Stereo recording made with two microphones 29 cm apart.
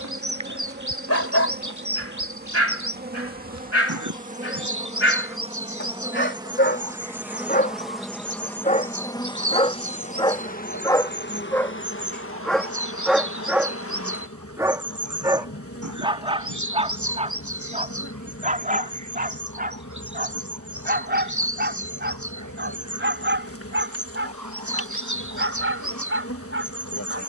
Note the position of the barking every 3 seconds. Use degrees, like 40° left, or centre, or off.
60° left, 50° left, 30° left, 10° left, centre, 20° right, 30° right, 40° right, 40° right.